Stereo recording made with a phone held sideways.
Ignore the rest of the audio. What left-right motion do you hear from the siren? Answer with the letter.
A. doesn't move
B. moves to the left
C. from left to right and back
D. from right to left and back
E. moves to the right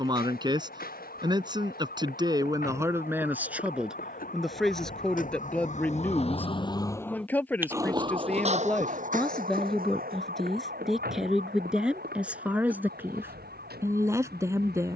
E.